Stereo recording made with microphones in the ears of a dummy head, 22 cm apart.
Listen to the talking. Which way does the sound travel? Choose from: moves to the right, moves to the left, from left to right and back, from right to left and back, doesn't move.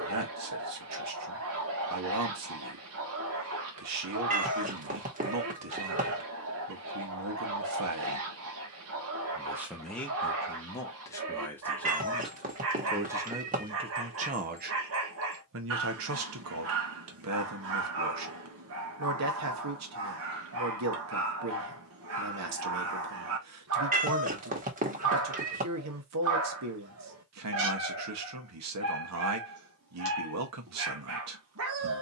from right to left and back.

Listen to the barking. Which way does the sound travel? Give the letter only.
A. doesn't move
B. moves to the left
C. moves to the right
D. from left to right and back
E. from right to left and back
A.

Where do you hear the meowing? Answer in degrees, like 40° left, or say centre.
30° right.